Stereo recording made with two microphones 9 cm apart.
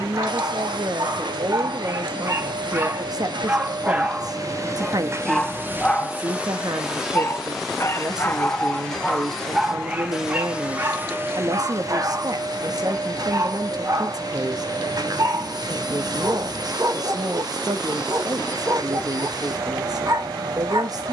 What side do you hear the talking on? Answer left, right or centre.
right.